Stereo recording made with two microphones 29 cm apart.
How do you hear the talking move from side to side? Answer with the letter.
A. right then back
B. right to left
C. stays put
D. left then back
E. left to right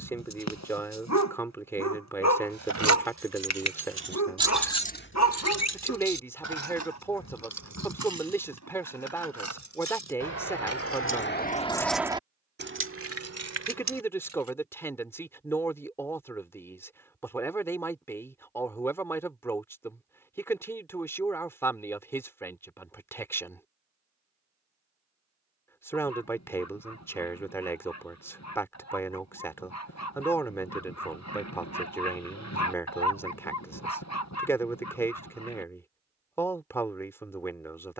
C.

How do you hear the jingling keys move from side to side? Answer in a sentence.
You can hear the jingling keys move from right to left and back again.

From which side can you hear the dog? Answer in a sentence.
You can hear the dog on the left.